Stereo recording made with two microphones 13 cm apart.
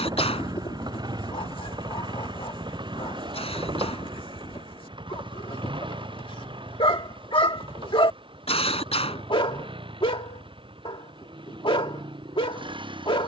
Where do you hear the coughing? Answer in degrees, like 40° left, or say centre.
50° left.